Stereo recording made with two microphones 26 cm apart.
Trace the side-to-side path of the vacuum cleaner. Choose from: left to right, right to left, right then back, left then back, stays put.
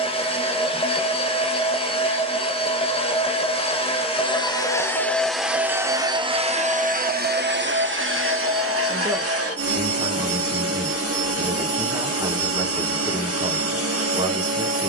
left to right.